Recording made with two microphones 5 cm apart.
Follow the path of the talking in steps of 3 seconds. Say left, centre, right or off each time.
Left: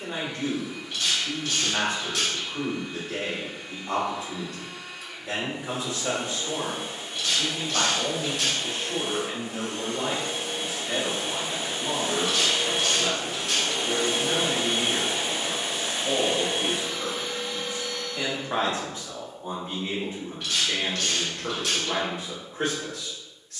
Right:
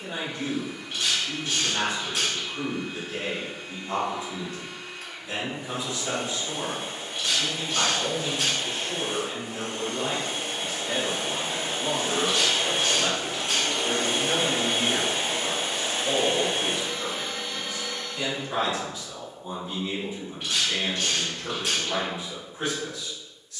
left, left, left, centre, right, centre, left, left.